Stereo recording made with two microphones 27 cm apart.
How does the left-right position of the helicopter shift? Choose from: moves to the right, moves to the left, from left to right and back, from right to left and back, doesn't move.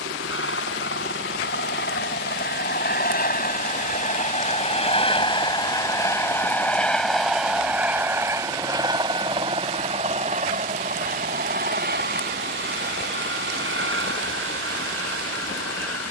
moves to the right.